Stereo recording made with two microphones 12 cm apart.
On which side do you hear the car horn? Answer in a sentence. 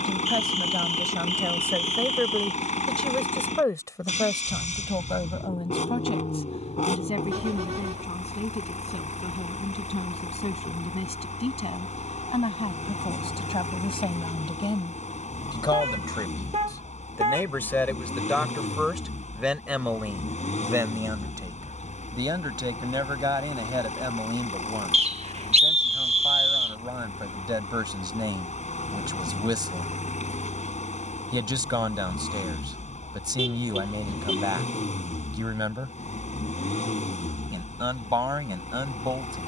You can hear the car horn on the right.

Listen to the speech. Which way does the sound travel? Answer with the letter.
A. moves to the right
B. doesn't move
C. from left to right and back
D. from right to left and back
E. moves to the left
D.